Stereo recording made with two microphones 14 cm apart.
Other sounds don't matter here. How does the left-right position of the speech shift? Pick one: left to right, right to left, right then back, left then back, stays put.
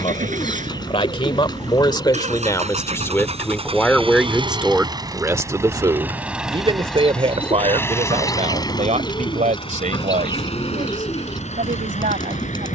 left to right.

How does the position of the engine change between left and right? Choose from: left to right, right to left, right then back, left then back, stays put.
right to left.